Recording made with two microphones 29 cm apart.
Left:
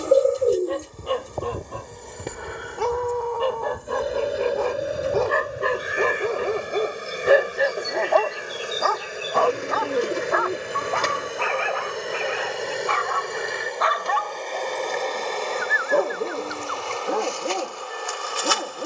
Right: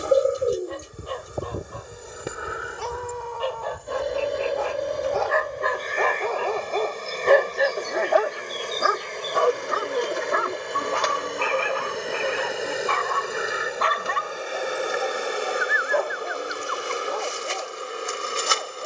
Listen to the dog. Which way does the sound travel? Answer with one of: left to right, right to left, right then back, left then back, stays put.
right then back.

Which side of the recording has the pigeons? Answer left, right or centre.
left.